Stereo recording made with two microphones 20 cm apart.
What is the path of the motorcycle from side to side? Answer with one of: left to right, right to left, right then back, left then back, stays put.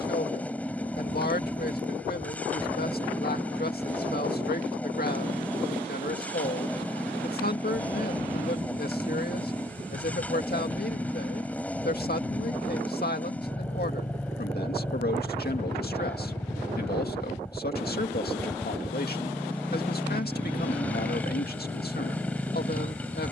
stays put.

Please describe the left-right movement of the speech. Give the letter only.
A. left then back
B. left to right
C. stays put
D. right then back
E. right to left
C.